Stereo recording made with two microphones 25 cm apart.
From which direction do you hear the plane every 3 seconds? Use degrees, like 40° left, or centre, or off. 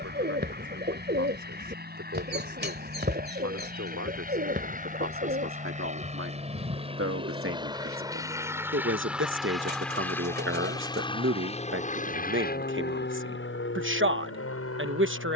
50° right, 40° right, 20° right, 10° left, 50° left.